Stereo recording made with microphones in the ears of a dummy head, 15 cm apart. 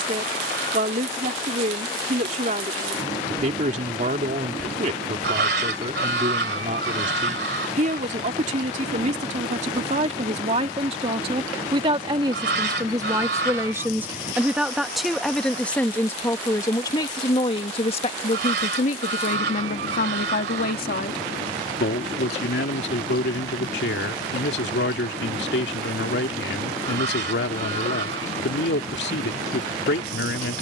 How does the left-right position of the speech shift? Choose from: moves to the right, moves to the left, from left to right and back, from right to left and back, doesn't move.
moves to the left.